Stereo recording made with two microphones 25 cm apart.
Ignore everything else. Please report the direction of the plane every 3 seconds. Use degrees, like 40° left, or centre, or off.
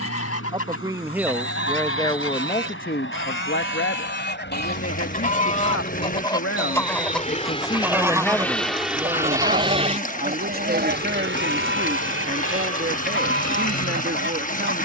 60° left, 50° left, 20° left, 30° right, 60° right.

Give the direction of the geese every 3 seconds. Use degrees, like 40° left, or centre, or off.
60° left, 40° left, centre, 40° right, 50° right.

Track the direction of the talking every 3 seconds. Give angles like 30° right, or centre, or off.
10° left, 60° left, 20° left, 40° right, 40° right.